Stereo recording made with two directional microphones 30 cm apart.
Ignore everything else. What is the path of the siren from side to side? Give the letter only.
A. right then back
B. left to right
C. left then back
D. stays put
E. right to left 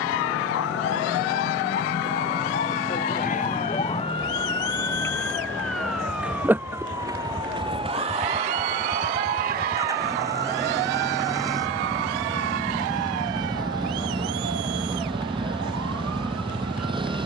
B.